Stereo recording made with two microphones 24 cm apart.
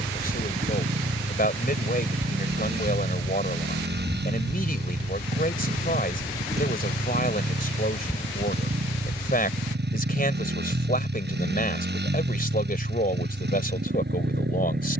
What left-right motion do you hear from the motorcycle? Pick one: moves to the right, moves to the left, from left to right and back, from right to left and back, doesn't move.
doesn't move.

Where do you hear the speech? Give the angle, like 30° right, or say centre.
40° left.